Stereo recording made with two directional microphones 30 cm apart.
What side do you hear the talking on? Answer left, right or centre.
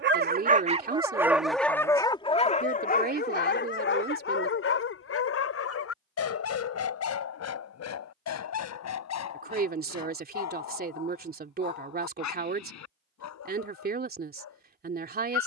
right.